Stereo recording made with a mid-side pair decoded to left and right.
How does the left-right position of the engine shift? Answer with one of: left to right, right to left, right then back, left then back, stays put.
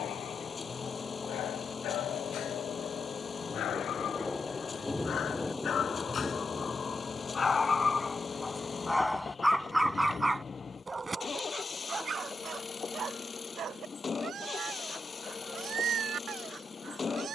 stays put.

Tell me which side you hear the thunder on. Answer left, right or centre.
centre.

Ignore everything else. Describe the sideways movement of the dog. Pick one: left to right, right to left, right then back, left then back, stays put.
left to right.